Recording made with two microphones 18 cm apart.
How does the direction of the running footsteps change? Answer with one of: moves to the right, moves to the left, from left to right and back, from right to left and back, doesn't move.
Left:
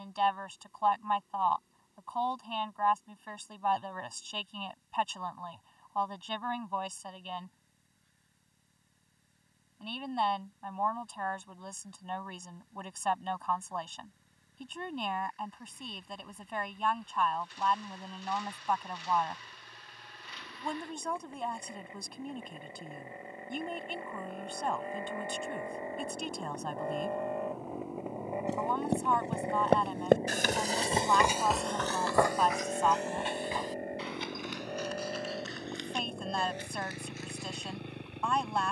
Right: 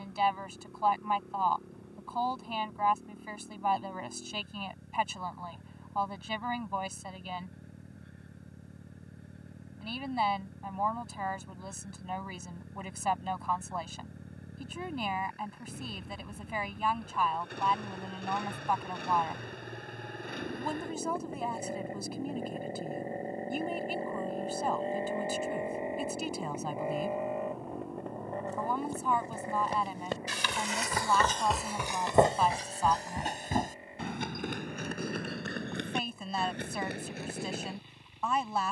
moves to the right.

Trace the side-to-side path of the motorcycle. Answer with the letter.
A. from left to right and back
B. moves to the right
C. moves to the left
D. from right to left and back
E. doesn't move
C.